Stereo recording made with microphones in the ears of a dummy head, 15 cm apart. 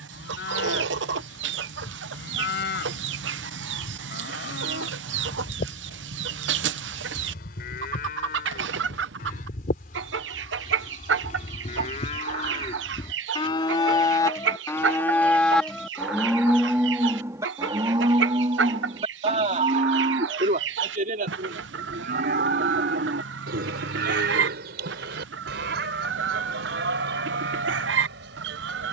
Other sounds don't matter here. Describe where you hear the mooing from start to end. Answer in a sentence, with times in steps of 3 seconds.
You can hear the mooing on the left from 0 s, in the centre from 15 s and on the right from 18 s.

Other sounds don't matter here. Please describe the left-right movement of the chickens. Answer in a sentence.
In this clip you hear the chickens stay put.